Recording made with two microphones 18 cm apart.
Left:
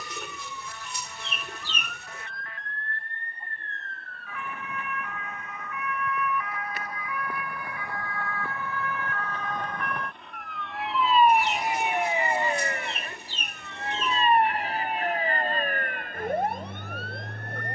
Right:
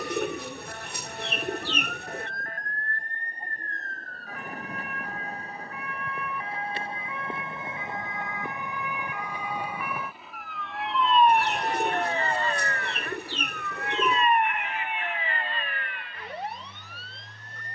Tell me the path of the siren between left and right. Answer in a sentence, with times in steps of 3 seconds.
In this clip you hear the siren on the right from 0 s, in the centre from 9 s and on the left from 12 s.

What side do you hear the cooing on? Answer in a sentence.
In this clip you hear the cooing on the right.